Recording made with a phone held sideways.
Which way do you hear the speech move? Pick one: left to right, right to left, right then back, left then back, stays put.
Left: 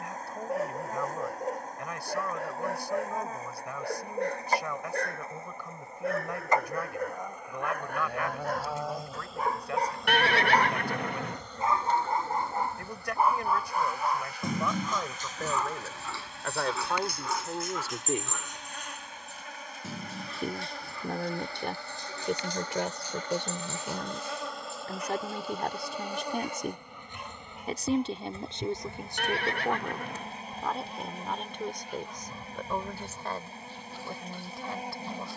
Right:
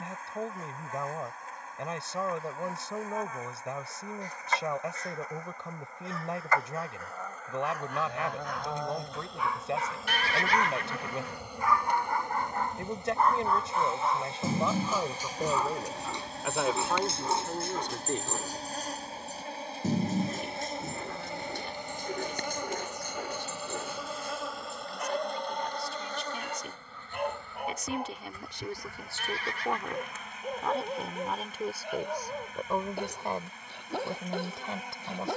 left then back.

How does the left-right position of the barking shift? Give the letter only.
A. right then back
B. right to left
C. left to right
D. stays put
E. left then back
C.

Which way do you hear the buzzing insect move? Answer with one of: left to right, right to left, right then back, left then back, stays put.
right then back.